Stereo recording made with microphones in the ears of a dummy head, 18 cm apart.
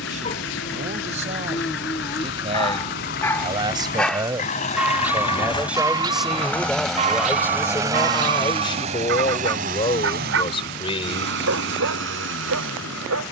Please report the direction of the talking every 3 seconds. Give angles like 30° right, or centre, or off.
30° right, 10° right, 10° left, 30° left, off.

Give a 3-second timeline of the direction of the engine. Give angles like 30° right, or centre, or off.
60° left, 30° left, 10° right, 50° right, 60° right.